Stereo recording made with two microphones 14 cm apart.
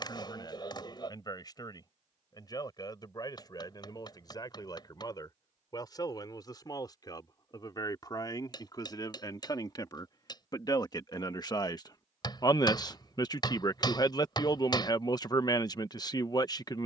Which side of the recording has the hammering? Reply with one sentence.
In this clip you hear the hammering on the left.